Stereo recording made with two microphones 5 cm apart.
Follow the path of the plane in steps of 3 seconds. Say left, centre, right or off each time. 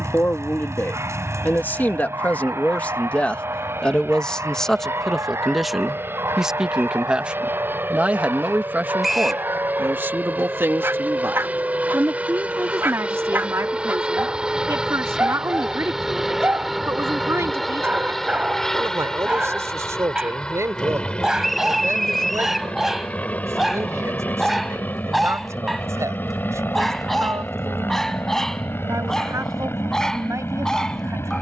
right, right, right, right, right, centre, centre, left, left, left, left.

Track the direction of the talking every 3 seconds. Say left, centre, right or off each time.
left, centre, right, right, right, right, right, right, right, right, right.